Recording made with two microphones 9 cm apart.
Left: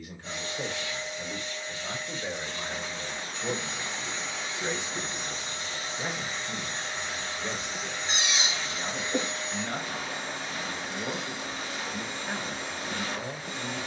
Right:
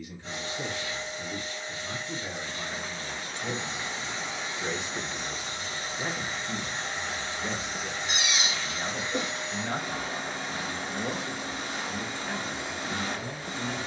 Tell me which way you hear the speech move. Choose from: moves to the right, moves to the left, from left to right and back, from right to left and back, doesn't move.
from left to right and back.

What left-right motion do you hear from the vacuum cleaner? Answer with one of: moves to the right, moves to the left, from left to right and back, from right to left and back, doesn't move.
doesn't move.